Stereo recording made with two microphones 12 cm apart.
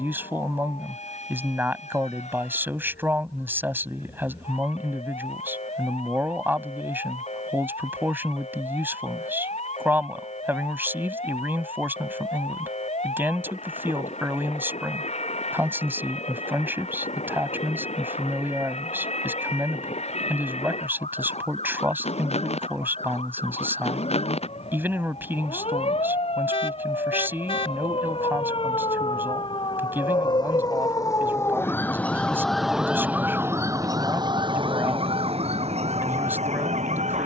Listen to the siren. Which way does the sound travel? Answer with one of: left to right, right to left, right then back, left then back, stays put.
left to right.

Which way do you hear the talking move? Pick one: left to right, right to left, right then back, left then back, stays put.
stays put.